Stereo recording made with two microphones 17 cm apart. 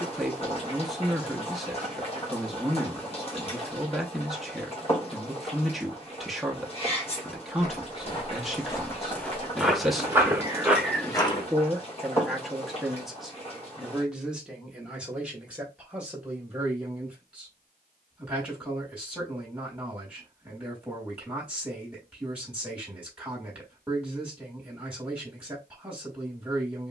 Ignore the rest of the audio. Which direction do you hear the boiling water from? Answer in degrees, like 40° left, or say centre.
40° left.